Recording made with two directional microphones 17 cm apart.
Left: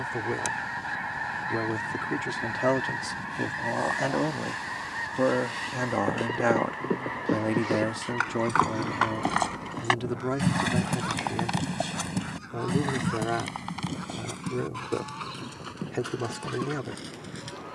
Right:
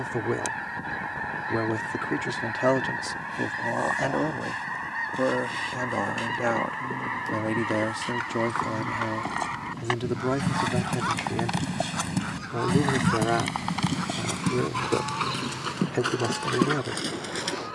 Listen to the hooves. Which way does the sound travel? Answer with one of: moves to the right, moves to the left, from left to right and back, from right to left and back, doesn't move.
moves to the right.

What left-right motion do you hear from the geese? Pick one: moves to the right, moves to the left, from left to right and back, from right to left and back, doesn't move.
moves to the right.